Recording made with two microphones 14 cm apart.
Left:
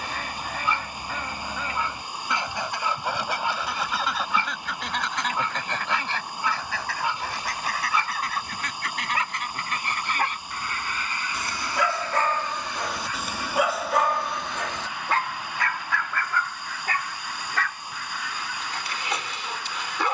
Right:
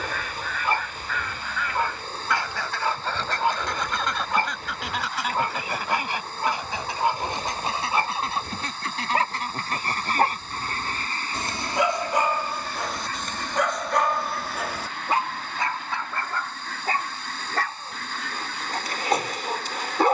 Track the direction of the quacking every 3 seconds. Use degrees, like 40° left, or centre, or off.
30° left, centre, 20° right, 40° right, 50° right, 50° right, 50° right.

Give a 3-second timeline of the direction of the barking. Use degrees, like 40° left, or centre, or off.
50° right, 50° right, 50° right, 40° right, centre, 30° right, 50° right.